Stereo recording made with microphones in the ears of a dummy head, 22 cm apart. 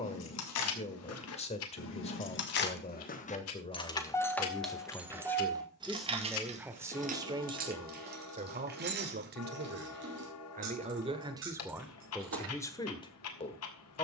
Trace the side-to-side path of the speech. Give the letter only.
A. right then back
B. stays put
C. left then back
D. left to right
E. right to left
A.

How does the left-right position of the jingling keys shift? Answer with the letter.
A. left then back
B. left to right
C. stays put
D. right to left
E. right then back
B.